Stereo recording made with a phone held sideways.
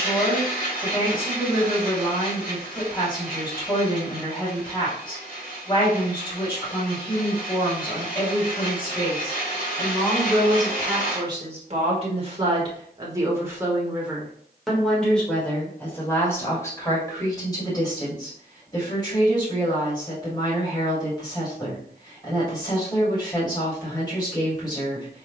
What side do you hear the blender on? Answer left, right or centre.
left.